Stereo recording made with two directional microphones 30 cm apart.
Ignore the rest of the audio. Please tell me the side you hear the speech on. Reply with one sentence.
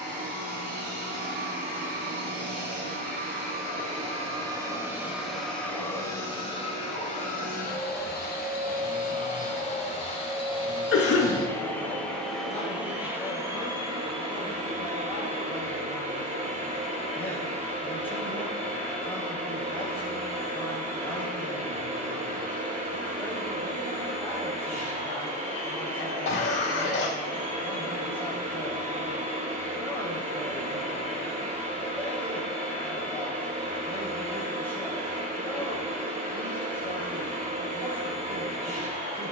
You can hear the speech in the centre.